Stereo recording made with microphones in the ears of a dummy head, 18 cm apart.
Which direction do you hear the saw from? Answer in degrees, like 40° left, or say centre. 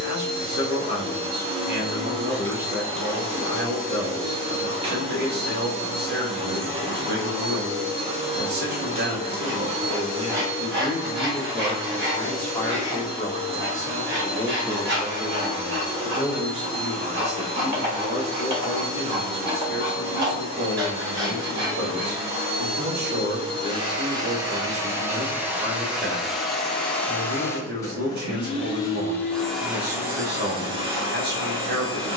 60° right.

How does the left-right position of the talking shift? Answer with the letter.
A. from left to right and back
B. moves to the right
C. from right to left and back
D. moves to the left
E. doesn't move
C.